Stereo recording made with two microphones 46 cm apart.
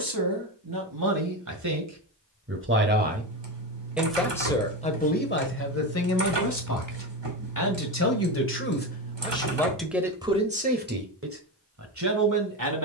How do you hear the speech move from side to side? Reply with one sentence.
You can hear the speech move from right to left and back again.